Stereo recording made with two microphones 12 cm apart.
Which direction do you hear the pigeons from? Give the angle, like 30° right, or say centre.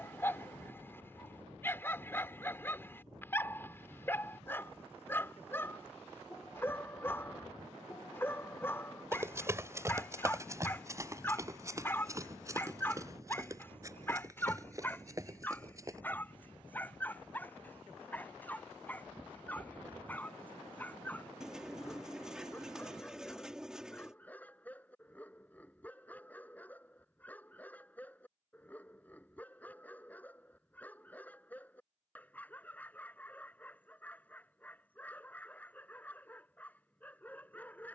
10° right.